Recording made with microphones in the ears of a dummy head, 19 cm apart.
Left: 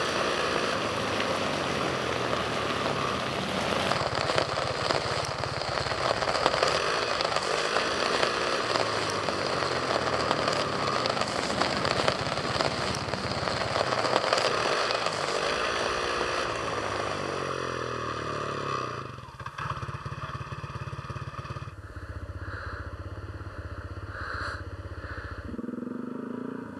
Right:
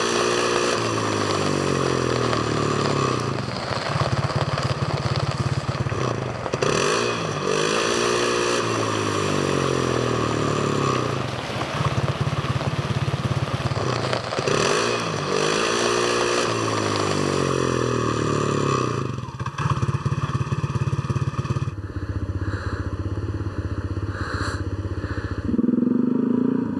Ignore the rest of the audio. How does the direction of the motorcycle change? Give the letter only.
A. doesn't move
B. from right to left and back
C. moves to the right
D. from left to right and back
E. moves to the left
A.